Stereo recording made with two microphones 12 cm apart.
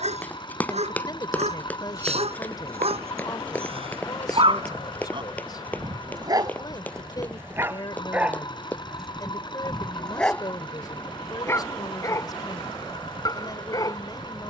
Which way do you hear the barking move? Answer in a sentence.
You can hear the barking travel towards the left.